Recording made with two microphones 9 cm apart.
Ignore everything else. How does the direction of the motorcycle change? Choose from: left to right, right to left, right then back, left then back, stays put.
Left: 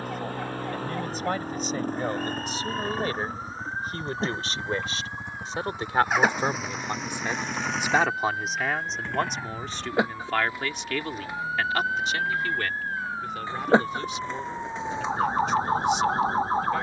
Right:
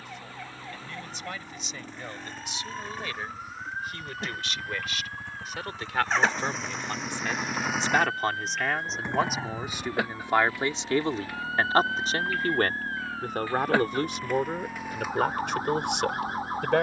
left to right.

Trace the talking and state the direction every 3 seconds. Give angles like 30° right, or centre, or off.
40° left, 30° left, 10° left, 20° right, 50° right, 70° right.